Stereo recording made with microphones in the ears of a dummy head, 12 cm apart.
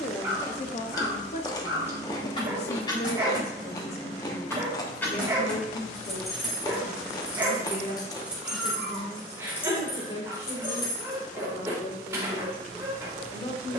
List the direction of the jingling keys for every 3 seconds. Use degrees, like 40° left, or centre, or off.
40° left, 20° left, centre, 20° left, off.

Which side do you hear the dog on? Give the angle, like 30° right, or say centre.
20° right.